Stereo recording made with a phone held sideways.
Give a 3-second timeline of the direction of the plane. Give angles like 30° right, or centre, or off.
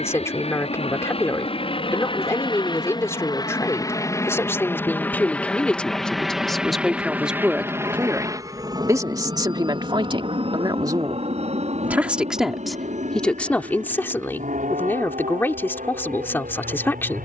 40° left, 20° left, 10° right, 40° right, 50° right, 60° right.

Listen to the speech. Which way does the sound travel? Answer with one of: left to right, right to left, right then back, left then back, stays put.
right then back.